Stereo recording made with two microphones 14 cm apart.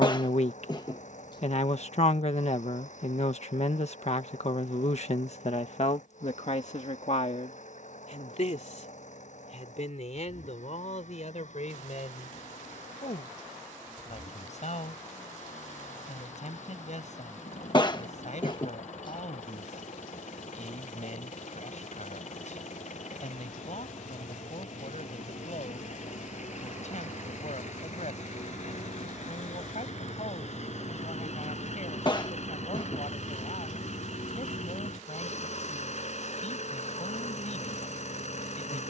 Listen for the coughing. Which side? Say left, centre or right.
left.